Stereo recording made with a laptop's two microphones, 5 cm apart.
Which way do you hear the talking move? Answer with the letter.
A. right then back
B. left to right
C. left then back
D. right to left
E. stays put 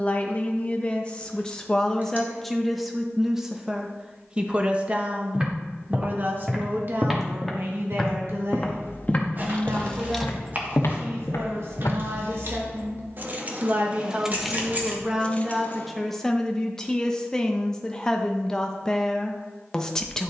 A.